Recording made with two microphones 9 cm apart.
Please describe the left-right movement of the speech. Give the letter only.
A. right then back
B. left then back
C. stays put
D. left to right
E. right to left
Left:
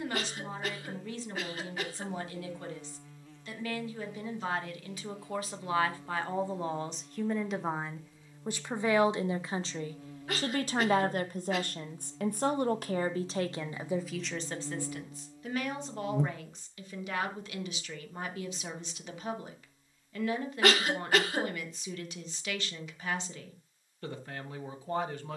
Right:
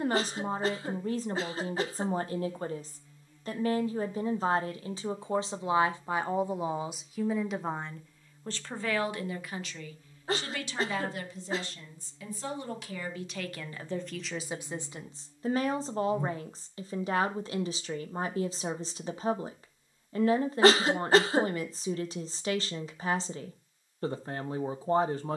B.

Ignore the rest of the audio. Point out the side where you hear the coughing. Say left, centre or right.
right.